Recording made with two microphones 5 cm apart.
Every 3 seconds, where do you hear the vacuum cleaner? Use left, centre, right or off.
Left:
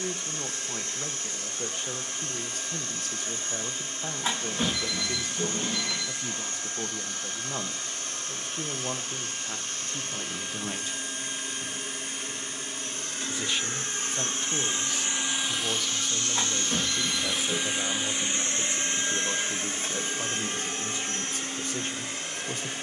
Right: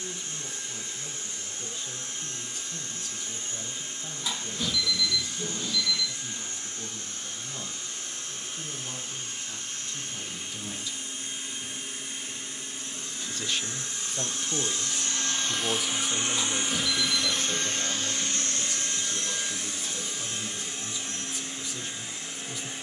left, left, left, left, left, centre, left, left.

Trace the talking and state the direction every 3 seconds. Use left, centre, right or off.
left, left, left, left, centre, centre, left, left.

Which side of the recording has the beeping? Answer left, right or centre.
left.